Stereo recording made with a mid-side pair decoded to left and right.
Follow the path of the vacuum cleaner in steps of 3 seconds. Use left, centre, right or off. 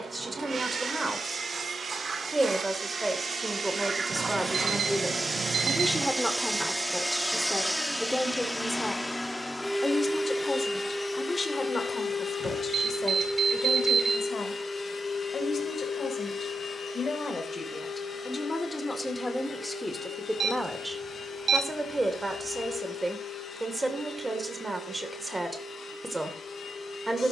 right, right, centre, left, left, left, left, left, left.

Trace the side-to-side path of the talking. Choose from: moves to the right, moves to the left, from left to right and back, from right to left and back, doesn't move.
from right to left and back.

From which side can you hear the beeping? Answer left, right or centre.
right.